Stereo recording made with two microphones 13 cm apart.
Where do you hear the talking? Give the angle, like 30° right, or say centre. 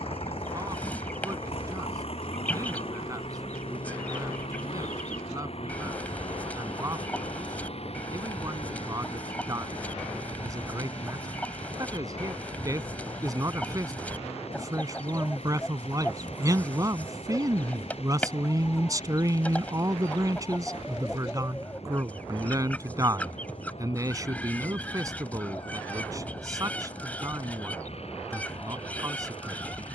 30° right.